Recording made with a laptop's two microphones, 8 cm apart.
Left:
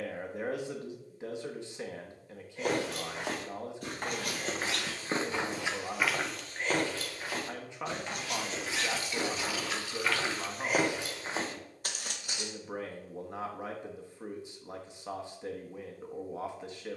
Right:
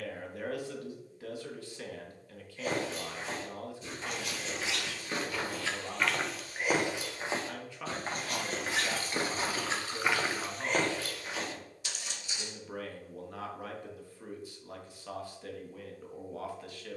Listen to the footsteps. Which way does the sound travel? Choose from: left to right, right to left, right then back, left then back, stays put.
right then back.